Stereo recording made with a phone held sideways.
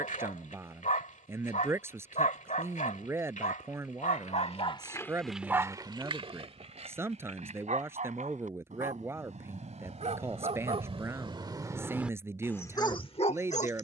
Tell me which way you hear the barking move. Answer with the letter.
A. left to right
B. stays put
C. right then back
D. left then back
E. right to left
C.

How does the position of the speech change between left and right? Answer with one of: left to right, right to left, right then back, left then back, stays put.
stays put.